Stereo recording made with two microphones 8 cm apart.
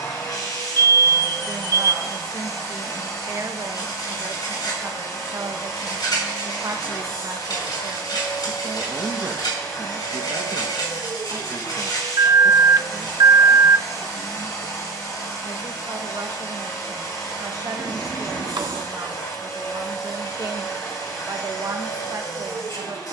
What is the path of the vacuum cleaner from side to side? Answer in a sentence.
In this clip you hear the vacuum cleaner stay put.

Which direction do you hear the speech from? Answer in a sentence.
In this clip you hear the speech on the right.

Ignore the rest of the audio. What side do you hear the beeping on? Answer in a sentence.
You can hear the beeping on the right.